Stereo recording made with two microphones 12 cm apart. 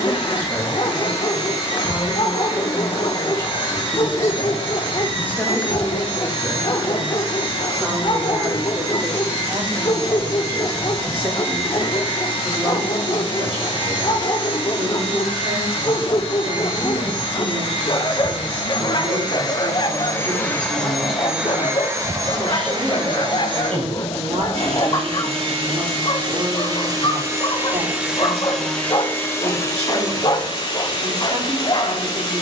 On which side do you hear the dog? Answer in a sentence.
In this clip you hear the dog on the left.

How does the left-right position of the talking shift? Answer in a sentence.
In this clip you hear the talking move to the right.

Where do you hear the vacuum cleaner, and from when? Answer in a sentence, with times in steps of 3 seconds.
In this clip you hear the vacuum cleaner on the left from 0 s, on the right from 21 s, in the centre from 27 s and on the left from 30 s.